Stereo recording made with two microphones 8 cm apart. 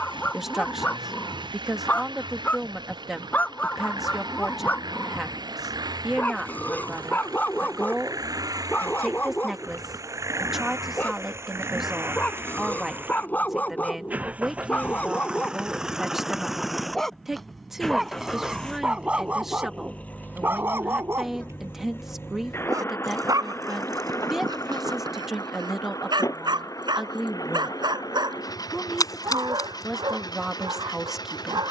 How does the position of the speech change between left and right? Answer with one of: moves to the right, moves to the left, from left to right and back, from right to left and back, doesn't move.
doesn't move.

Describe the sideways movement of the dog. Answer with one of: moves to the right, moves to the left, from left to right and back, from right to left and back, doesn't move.
moves to the right.